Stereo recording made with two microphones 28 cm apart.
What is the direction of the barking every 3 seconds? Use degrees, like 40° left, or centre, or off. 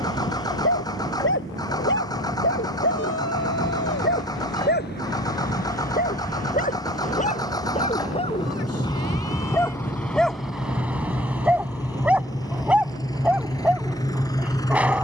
40° left, 40° left, 30° left, centre, 10° right.